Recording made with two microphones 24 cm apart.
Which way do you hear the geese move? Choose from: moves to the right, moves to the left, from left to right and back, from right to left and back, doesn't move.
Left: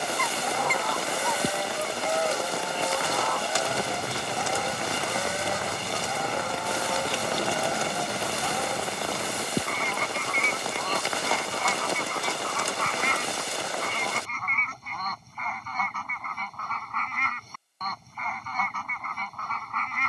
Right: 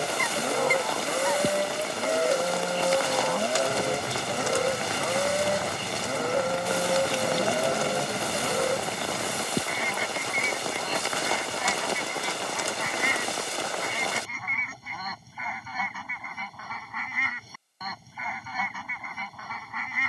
doesn't move.